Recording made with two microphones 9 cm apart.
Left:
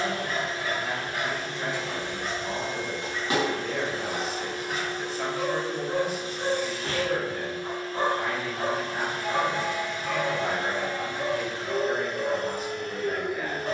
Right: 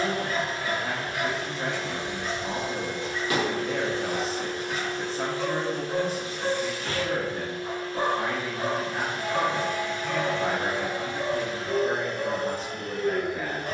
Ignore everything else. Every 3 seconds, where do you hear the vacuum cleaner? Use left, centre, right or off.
right, centre, left, centre, right.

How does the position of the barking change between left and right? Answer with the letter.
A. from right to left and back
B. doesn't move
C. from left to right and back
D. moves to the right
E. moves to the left
B.